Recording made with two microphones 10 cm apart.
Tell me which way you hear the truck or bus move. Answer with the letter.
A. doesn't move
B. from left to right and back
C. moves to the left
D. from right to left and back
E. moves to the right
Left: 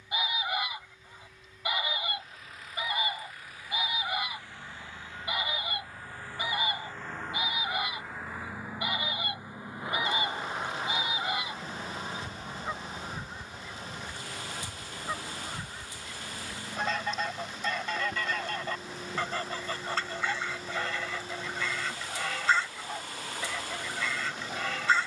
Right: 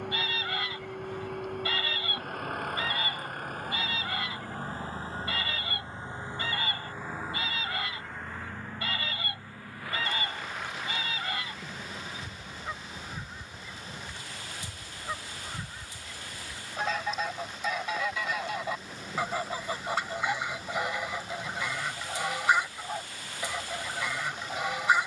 C.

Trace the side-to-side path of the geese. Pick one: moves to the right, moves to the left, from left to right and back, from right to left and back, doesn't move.
moves to the right.